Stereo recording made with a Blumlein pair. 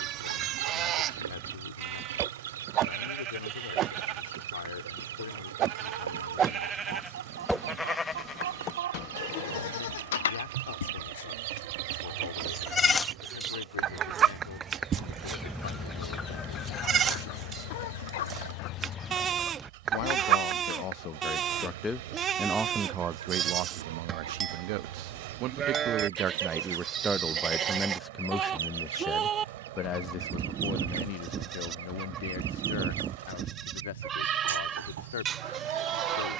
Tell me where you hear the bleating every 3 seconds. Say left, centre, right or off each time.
right, right, centre, left, centre, right, right, right, right, right, right, right.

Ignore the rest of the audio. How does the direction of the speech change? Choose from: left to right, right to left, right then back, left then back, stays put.
right then back.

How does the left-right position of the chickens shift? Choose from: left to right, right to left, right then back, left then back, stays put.
left then back.